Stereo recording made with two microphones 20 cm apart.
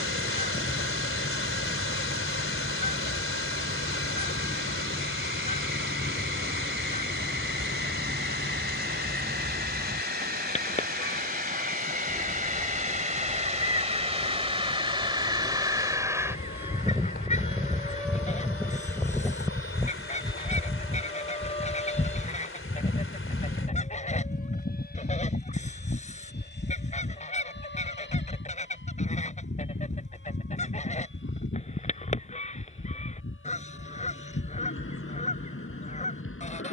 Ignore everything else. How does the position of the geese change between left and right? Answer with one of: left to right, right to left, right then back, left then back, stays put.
stays put.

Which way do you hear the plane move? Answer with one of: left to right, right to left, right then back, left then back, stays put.
right to left.